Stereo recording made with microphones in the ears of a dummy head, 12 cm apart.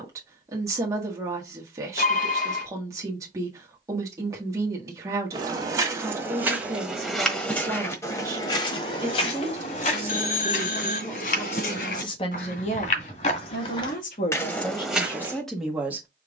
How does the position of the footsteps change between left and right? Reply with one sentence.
In this clip you hear the footsteps go left and come back.